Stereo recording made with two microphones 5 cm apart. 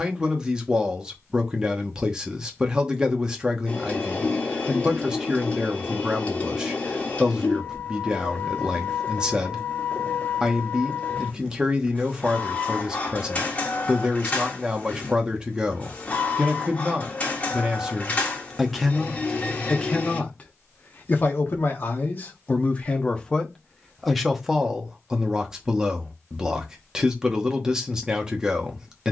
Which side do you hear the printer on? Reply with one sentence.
In this clip you hear the printer on the left.